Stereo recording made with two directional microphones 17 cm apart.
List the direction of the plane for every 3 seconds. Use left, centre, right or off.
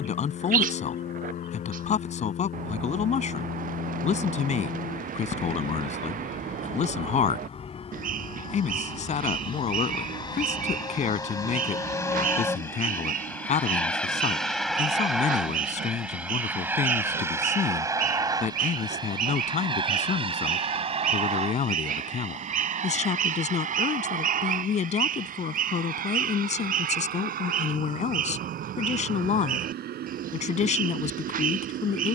left, left, left, left, centre, centre, right, right, right, right, right.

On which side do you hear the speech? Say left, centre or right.
left.